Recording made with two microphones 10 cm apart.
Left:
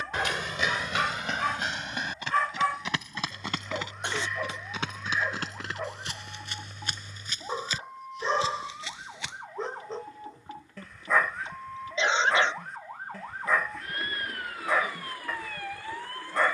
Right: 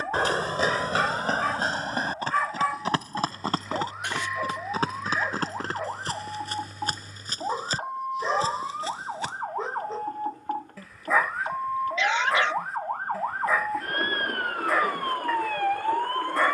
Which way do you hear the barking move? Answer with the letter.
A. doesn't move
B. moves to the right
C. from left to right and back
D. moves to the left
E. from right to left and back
A.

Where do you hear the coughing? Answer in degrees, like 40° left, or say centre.
30° left.